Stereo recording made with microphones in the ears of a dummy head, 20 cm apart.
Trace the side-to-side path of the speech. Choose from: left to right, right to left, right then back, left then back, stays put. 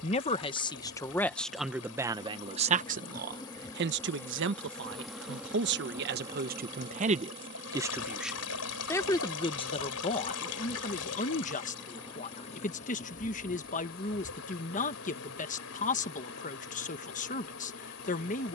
right then back.